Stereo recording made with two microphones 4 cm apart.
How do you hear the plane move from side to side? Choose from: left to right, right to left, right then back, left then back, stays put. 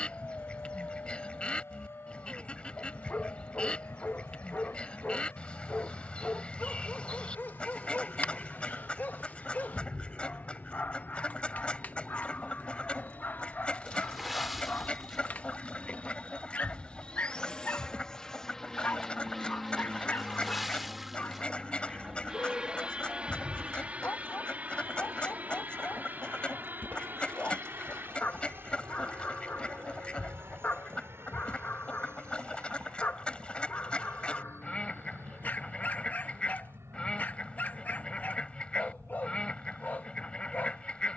left to right.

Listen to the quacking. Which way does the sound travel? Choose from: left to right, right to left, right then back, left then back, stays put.
stays put.